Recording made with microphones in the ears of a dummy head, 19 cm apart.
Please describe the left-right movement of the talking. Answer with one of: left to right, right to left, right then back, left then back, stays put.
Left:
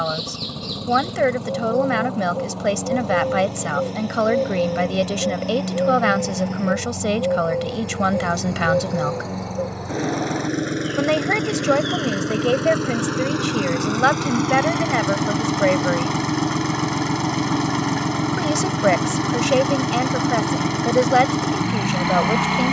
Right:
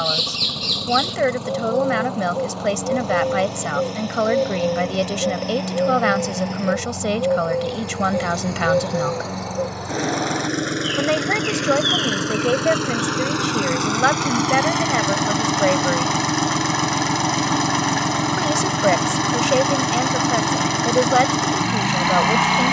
stays put.